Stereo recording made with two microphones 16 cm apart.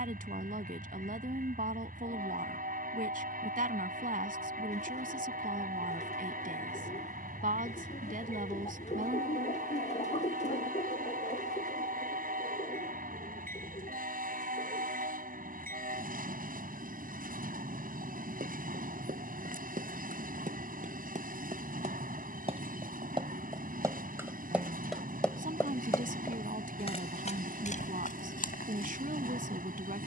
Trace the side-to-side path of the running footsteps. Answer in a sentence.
You can hear the running footsteps move from right to left.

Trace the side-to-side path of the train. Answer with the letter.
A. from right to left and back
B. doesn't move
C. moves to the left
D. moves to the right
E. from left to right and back
B.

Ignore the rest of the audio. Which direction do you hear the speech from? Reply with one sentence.
In this clip you hear the speech on the right.